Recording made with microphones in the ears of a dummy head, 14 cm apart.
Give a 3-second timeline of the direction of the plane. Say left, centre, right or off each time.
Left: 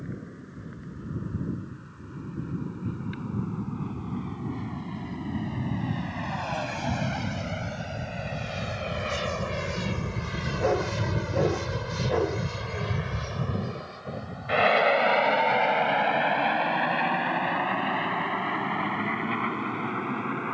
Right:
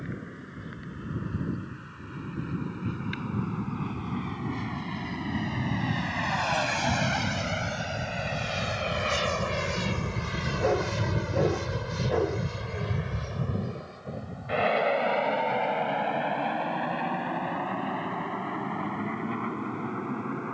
right, right, right, centre, left, left, left.